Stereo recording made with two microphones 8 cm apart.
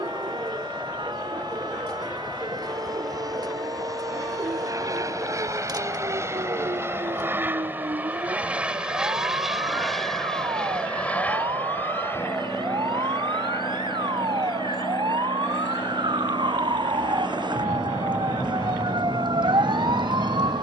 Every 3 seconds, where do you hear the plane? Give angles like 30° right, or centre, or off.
60° right, 50° right, 30° right, 10° left, 40° left, 50° left, 60° left.